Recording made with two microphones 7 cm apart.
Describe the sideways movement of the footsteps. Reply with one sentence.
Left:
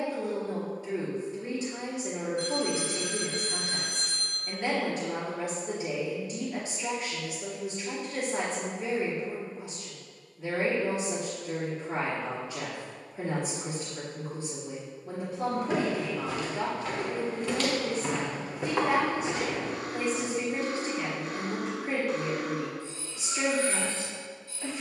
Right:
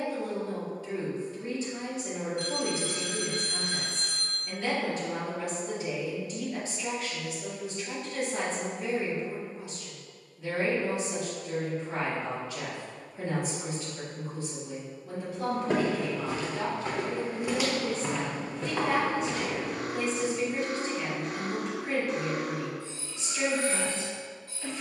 You can hear the footsteps move to the left.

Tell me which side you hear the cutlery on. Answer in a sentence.
You can hear the cutlery on the right.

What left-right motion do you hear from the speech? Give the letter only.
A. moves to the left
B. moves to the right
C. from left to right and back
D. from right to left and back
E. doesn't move
E.